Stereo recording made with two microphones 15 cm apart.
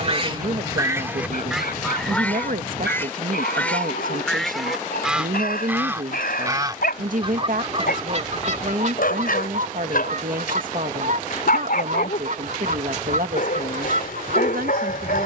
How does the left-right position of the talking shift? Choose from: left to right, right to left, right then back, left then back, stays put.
stays put.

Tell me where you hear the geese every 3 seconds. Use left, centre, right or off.
centre, centre, right, right, right.